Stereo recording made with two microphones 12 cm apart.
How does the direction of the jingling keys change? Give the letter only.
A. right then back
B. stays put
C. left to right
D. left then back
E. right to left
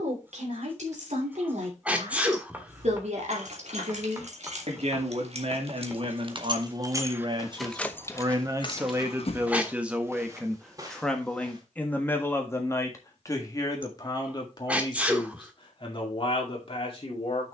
E.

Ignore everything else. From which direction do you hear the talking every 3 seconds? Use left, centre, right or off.
right, right, right, centre, left, left.